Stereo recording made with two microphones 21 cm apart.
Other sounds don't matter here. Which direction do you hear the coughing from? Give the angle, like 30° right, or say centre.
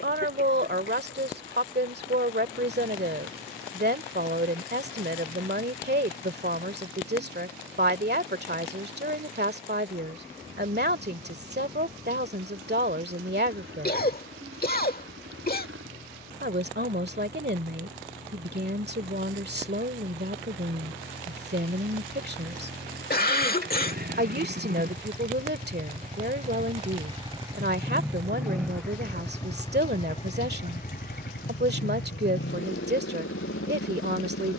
40° left.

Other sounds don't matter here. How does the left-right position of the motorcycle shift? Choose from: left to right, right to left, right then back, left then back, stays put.
right to left.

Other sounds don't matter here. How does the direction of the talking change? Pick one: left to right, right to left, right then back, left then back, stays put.
stays put.